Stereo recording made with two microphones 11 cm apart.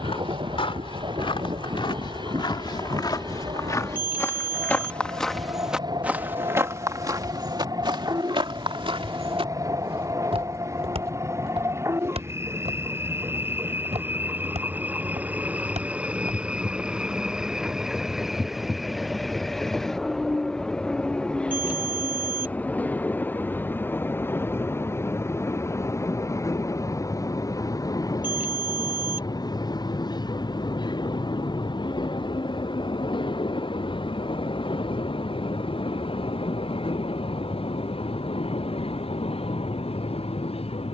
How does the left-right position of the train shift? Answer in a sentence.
In this clip you hear the train move from right to left.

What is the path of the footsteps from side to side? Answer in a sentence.
You can hear the footsteps move to the right.